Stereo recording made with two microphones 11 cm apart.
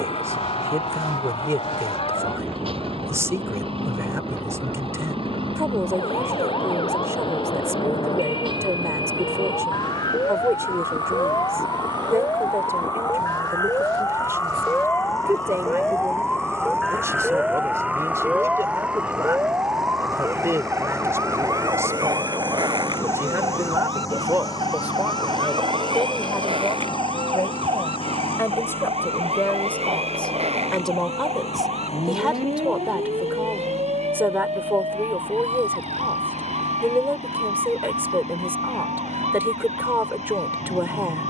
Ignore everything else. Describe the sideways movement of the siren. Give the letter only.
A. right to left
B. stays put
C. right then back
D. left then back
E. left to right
E.